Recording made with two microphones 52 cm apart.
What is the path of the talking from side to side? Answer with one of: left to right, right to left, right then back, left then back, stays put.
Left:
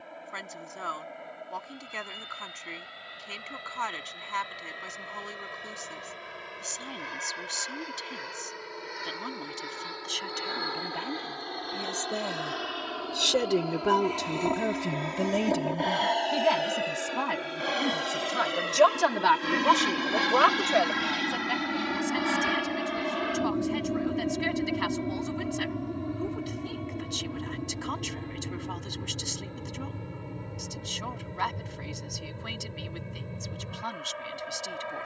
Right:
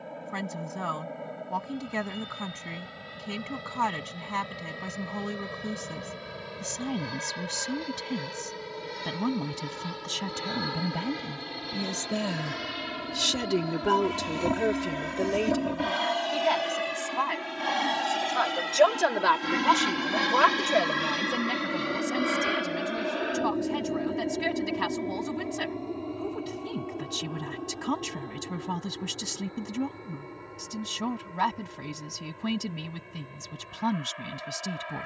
left then back.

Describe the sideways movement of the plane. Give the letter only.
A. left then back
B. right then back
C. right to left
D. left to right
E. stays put
C.